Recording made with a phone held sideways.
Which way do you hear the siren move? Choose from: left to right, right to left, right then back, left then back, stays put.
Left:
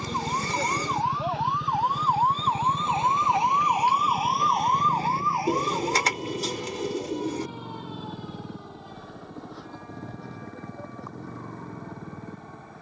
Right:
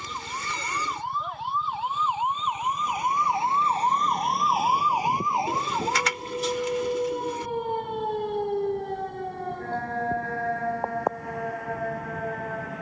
left to right.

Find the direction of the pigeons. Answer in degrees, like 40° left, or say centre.
40° left.